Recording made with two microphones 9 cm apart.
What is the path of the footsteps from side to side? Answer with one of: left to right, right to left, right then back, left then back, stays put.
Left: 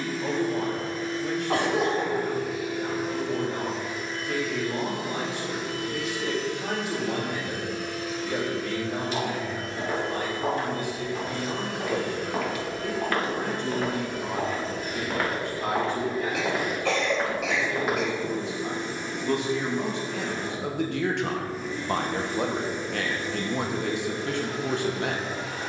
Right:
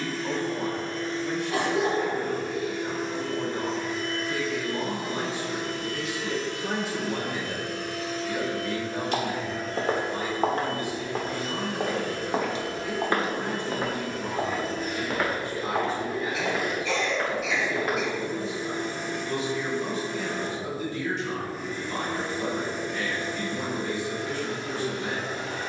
right to left.